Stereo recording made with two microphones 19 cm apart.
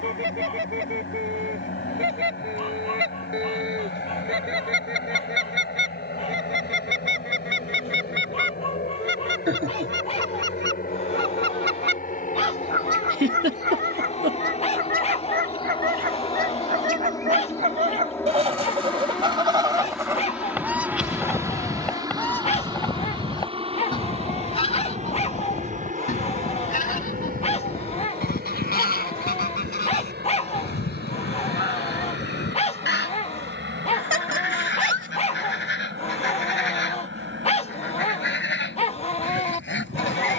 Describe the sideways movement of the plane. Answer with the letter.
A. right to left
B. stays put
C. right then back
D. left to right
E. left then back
D.